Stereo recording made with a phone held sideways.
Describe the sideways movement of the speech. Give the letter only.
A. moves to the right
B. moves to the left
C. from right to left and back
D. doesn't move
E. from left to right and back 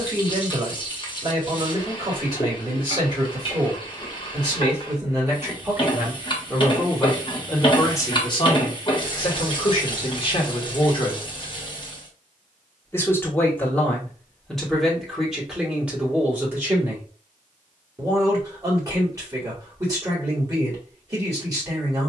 C.